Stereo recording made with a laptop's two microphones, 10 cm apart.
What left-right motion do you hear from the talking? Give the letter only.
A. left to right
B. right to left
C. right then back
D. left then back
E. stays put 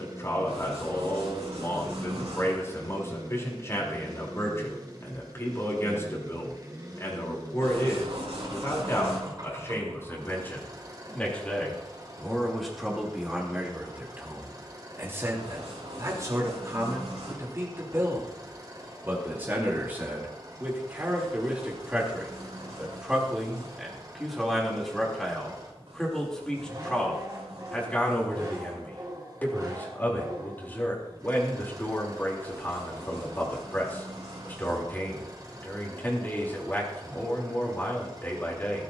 C.